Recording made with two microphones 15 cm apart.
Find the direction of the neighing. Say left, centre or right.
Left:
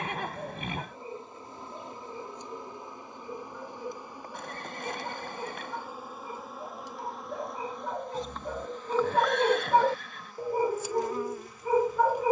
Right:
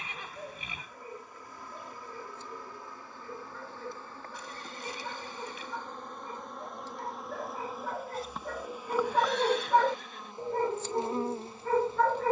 left.